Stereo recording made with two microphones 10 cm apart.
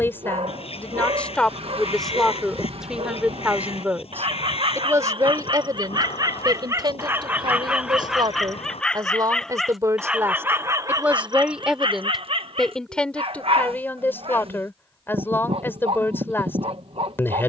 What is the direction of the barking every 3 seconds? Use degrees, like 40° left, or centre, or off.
70° right, 60° right, 20° right, 20° right, 70° right, 70° right.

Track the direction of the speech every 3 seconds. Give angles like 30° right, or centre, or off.
10° left, 30° right, 50° right, 20° right, 10° left, 20° left.